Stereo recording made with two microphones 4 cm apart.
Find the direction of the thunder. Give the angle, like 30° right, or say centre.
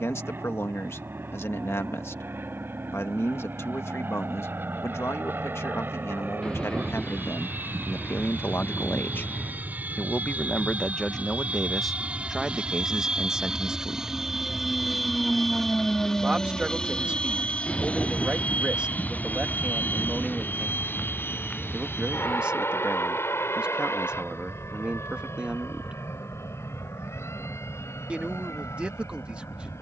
20° left.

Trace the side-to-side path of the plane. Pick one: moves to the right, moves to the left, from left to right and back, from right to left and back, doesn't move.
moves to the left.